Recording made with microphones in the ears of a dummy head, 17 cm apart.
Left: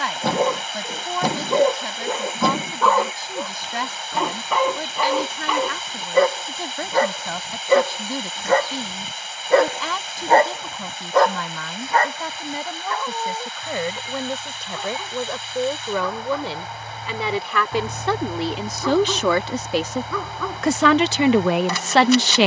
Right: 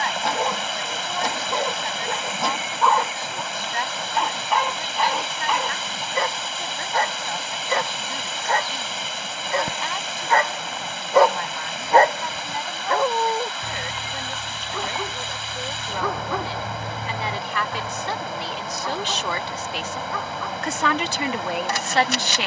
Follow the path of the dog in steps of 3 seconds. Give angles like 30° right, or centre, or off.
70° left, 70° left, 70° left, 20° left, 50° right, 30° right, 60° left, 70° left.